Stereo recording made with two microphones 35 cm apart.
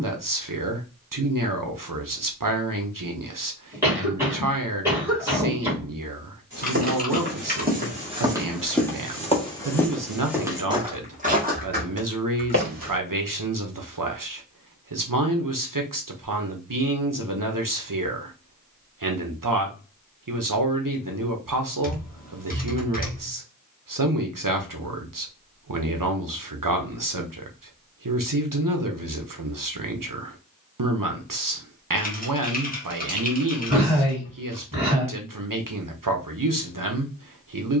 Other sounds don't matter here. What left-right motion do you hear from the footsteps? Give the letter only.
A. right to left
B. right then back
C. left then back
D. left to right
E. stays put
C.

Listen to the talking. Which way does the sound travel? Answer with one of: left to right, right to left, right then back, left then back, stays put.
stays put.